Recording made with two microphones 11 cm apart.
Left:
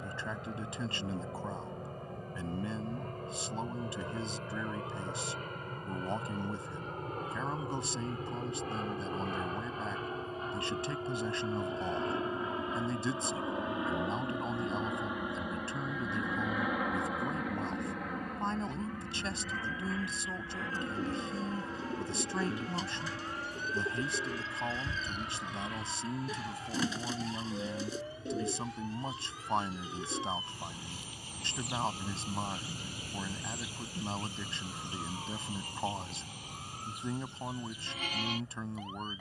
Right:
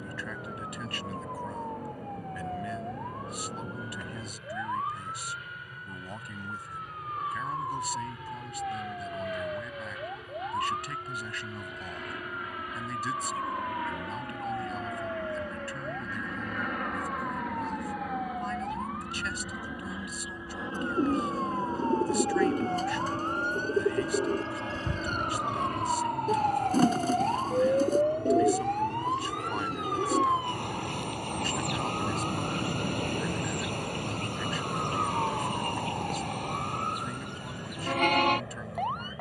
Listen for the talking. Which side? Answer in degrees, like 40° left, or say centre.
30° left.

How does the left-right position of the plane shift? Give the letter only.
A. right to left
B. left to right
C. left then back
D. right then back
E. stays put
B.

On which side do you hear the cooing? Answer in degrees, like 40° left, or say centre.
50° right.